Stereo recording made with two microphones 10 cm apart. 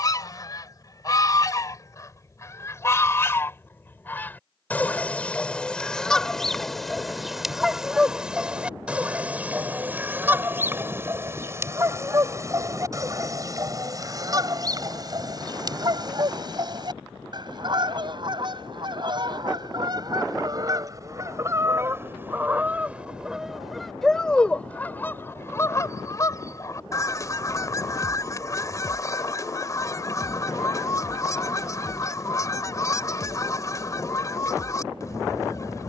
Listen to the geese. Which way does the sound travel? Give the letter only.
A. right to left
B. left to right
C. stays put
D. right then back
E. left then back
D.